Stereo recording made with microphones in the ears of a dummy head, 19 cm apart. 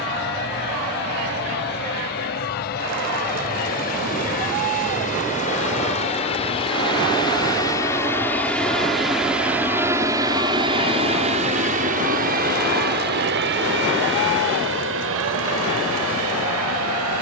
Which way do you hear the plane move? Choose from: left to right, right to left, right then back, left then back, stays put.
left to right.